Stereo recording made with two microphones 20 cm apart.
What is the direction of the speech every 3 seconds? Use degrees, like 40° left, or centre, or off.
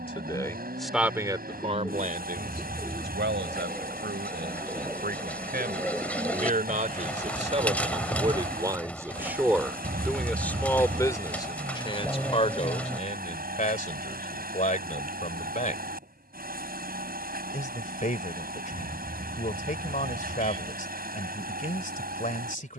20° right, 60° right, 30° right, 10° left, 40° left, 40° left, 40° left, 40° left.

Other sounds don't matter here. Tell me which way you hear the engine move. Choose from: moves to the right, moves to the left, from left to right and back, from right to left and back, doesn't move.
doesn't move.